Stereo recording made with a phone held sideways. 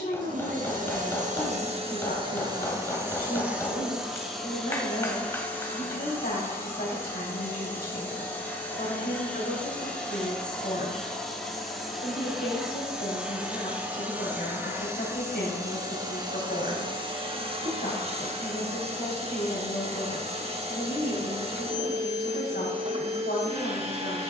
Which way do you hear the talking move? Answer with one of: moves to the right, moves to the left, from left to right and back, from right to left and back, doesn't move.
doesn't move.